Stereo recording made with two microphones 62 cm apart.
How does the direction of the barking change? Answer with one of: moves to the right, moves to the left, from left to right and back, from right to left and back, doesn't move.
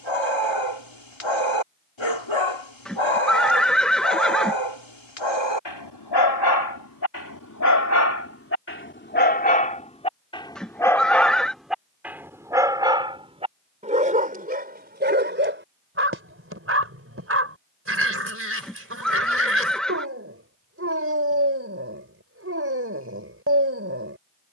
moves to the right.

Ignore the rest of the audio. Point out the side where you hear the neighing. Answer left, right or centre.
centre.